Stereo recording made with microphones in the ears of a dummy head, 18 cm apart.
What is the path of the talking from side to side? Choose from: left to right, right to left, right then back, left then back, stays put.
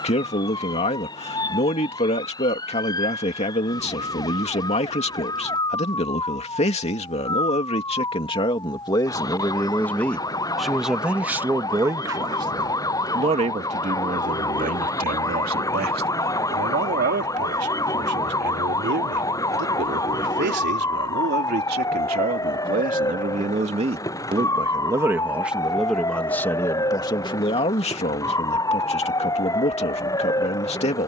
right then back.